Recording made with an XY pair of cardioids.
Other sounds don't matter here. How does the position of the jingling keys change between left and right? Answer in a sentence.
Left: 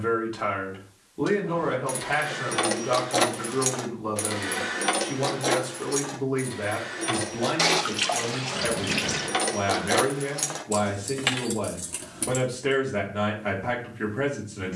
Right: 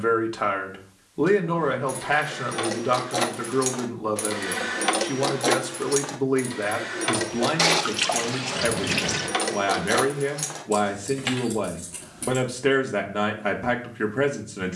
In this clip you hear the jingling keys move from left to right and back again.